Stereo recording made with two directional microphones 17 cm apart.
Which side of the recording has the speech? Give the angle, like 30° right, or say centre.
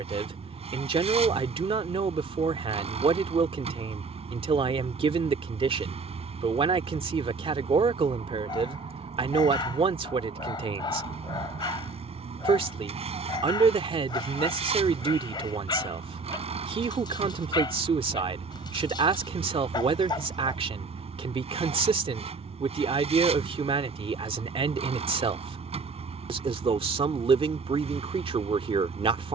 30° right.